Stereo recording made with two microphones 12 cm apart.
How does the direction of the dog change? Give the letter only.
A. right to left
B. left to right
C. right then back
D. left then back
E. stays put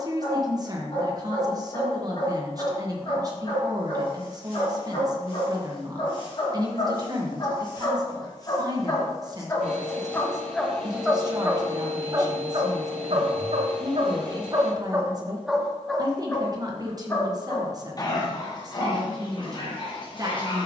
C.